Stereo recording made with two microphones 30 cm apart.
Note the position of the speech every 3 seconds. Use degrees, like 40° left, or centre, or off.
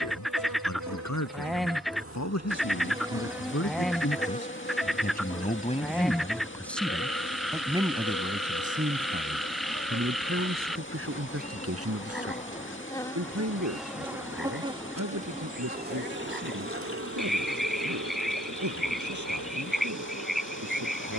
60° left, 40° left, 10° right, 40° right, 60° right, 60° right, 70° right.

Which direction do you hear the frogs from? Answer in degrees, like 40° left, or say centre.
centre.